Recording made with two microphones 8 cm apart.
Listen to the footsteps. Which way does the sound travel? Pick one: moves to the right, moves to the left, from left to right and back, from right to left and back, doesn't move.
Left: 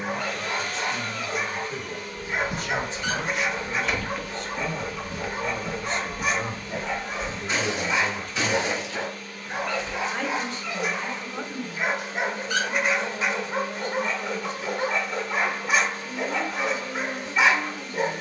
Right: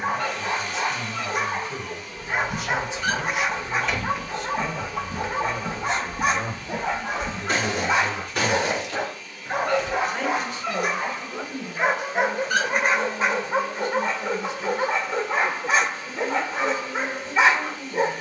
moves to the right.